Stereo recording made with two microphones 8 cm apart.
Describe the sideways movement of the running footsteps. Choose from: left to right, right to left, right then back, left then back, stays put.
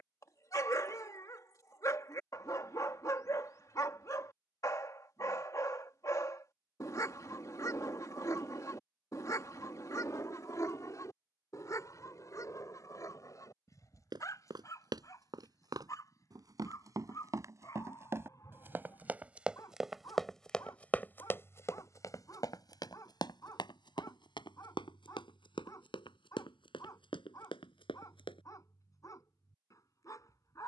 right to left.